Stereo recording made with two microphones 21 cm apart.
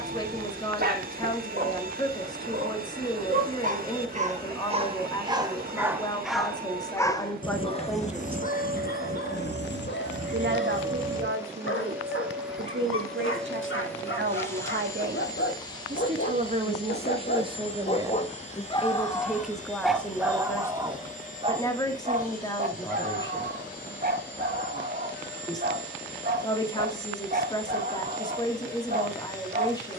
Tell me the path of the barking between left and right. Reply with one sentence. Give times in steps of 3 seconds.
You can hear the barking on the right from 0 s, on the left from 6 s, in the centre from 18 s and on the right from 21 s.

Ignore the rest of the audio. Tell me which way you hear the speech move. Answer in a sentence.
In this clip you hear the speech go right and come back.